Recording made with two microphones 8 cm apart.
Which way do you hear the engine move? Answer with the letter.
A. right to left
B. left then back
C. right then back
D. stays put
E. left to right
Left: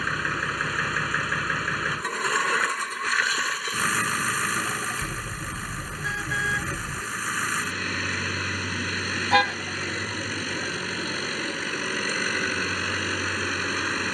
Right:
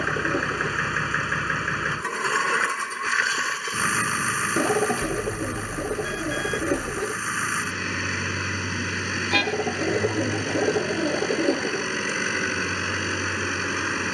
D.